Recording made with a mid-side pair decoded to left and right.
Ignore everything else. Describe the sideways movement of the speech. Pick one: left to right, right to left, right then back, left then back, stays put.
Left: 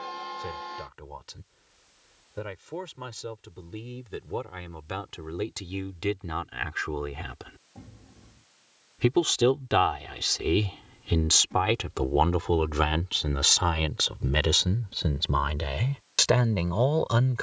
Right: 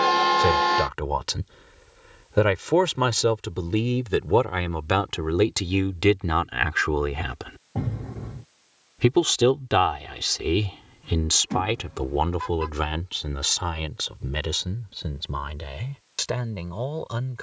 right to left.